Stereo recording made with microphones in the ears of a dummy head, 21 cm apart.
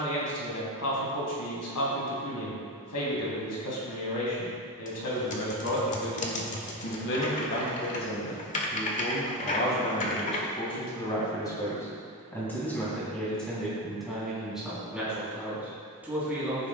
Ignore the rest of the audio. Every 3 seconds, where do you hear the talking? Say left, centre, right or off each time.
left, left, left, left, centre, centre.